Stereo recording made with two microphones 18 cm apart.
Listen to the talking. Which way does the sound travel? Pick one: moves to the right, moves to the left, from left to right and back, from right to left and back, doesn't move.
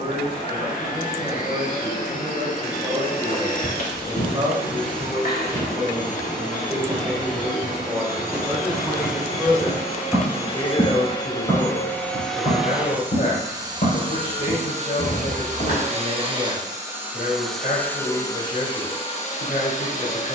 moves to the left.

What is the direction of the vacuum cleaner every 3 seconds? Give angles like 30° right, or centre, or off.
50° left, 50° left, 50° left, 30° left, 20° right, 20° right, 30° left.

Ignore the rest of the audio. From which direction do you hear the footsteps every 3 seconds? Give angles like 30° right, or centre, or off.
off, 40° left, 10° right, 20° left, 40° left, 60° left, off.